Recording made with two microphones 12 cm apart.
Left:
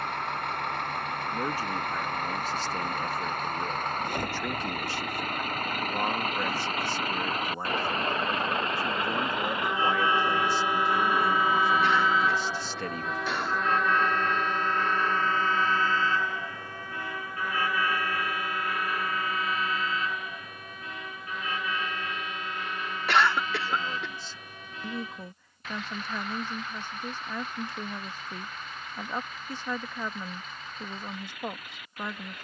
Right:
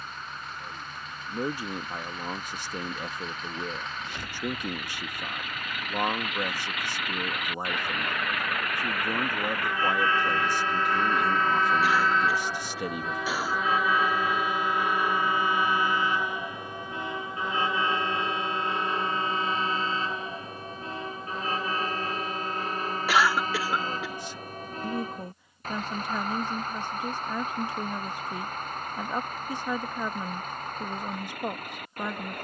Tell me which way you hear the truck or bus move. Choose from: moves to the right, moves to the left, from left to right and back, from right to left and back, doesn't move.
moves to the right.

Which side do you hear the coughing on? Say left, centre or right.
centre.